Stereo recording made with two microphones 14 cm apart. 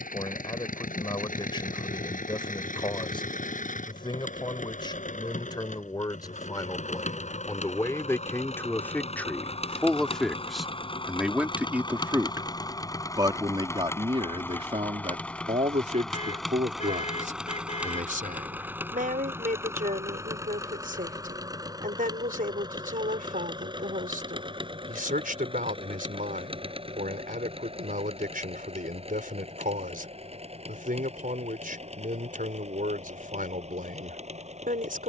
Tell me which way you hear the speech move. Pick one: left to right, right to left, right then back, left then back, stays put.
left to right.